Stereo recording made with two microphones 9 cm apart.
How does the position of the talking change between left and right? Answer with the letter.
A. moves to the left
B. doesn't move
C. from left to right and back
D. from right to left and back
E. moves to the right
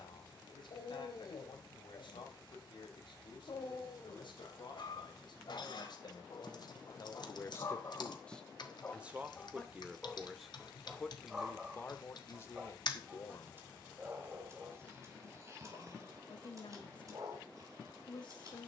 C.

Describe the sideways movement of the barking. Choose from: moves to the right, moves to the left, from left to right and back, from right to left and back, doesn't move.
moves to the right.